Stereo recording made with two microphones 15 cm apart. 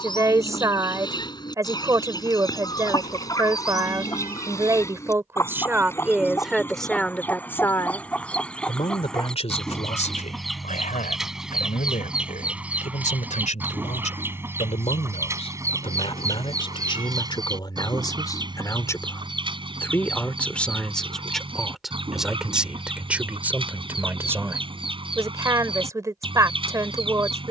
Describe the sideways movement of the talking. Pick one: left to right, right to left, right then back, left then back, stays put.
left then back.